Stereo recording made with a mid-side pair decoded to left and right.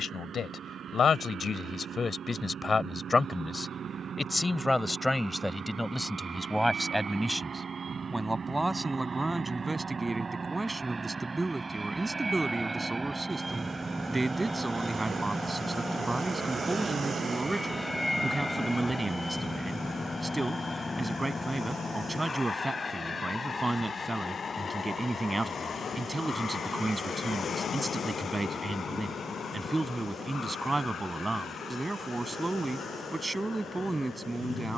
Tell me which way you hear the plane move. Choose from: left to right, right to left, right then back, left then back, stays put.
right to left.